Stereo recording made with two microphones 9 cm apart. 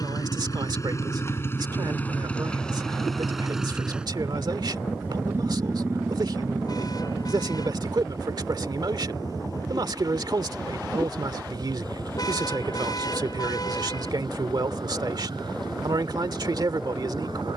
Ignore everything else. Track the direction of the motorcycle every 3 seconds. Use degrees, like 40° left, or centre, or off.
30° left, 10° right, 40° right, 50° right, 60° right, 60° right.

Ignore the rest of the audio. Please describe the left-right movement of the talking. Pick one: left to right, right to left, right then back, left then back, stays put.
stays put.